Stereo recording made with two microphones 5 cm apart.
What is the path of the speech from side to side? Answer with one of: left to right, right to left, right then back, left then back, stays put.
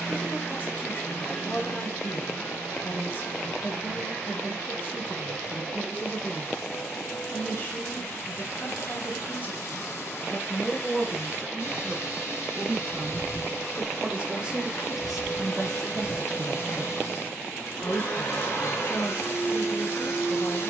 right then back.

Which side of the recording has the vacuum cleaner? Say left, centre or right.
left.